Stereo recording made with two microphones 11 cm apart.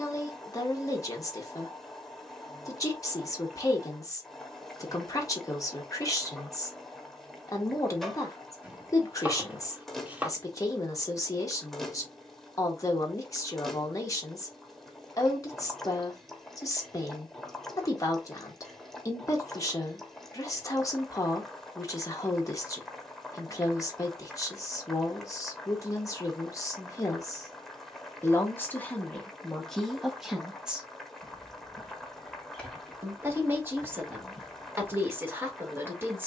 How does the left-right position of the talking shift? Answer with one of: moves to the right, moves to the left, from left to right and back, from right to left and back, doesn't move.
moves to the right.